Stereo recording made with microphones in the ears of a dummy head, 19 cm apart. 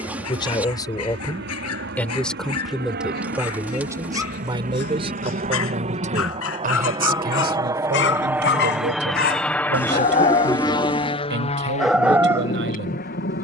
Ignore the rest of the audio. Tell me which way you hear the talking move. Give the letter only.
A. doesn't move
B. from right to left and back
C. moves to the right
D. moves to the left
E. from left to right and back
C.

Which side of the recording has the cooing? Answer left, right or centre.
centre.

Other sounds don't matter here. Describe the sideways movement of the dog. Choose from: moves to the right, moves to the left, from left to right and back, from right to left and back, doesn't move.
moves to the right.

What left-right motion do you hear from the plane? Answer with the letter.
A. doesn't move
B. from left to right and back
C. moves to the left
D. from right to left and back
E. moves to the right
C.